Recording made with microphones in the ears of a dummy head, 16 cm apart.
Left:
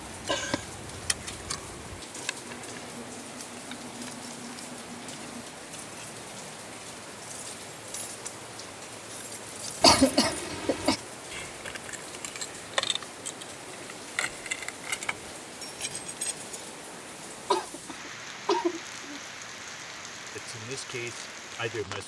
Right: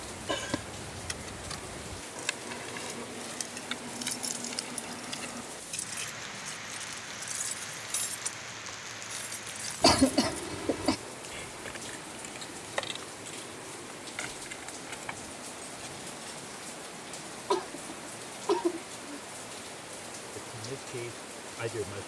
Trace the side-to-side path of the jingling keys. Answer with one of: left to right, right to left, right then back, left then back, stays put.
right then back.